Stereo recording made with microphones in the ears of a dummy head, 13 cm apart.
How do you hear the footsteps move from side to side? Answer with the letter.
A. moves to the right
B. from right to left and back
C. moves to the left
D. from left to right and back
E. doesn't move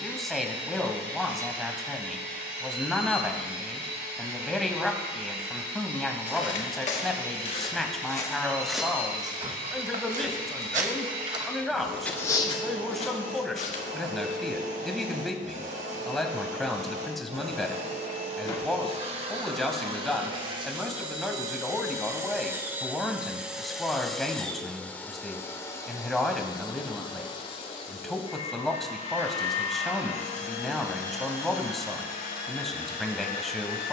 D.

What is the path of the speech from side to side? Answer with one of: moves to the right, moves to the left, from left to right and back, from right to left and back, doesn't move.
doesn't move.